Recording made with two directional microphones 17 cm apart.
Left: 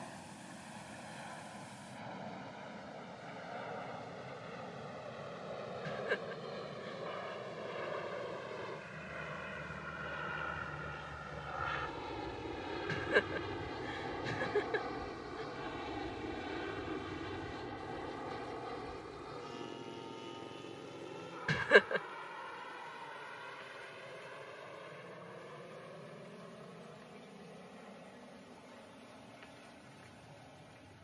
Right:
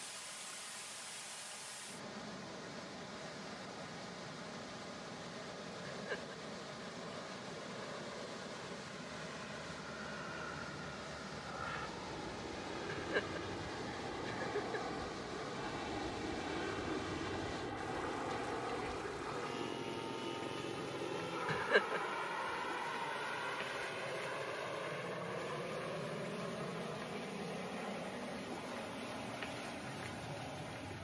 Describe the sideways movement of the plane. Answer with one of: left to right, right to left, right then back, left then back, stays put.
left to right.